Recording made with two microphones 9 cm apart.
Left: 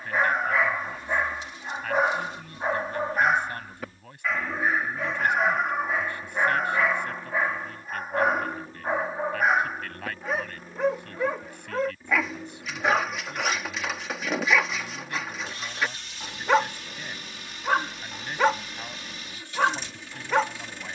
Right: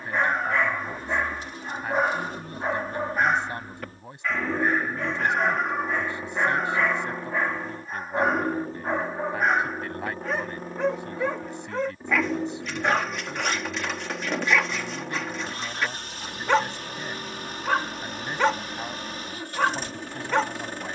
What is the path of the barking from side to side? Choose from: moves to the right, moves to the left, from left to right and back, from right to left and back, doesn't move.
doesn't move.